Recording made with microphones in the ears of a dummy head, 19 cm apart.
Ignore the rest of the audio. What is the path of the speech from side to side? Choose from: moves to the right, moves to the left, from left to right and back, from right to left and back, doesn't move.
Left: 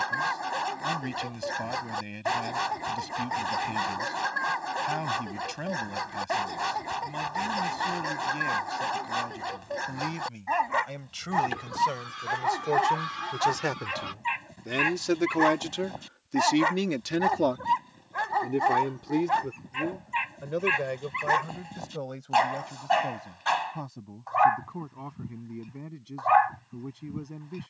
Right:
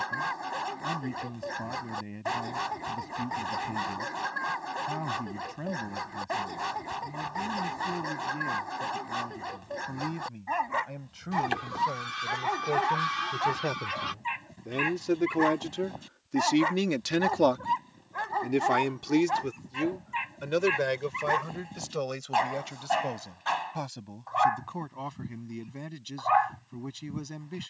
moves to the right.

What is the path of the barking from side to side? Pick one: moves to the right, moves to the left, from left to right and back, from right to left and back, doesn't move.
doesn't move.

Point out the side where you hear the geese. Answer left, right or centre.
right.